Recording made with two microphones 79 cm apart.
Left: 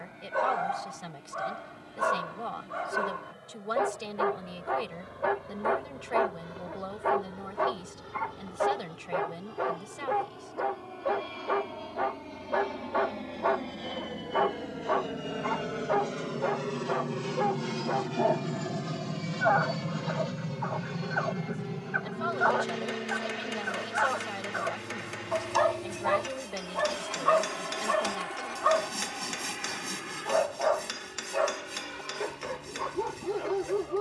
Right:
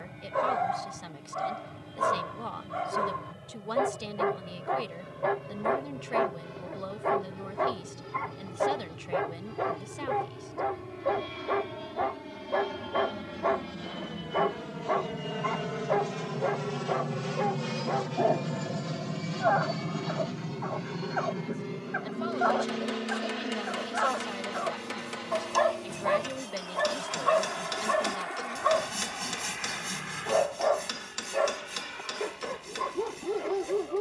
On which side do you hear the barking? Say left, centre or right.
left.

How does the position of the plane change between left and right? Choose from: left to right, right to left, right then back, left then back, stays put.
right to left.